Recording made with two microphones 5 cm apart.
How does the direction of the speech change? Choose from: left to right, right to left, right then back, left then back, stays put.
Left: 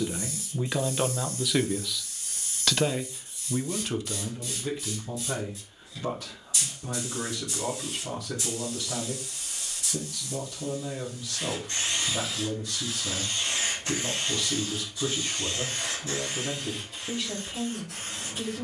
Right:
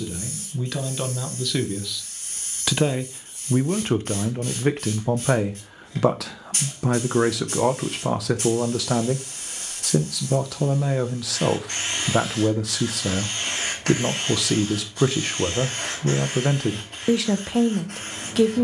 left to right.